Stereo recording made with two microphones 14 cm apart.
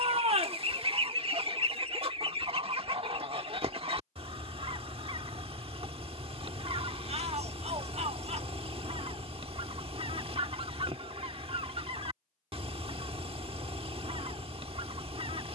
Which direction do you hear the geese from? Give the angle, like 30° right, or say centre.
40° right.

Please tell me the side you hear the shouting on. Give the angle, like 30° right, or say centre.
50° right.